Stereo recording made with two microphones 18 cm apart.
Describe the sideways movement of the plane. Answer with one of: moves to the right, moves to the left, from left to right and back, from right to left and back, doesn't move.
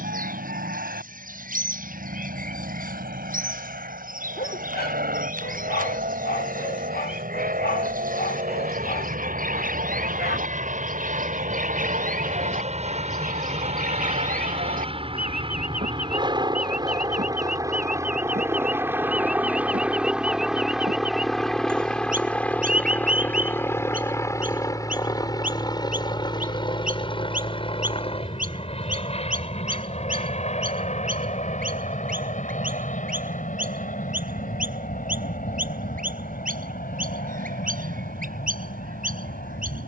moves to the left.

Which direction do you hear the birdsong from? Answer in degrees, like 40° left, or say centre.
50° right.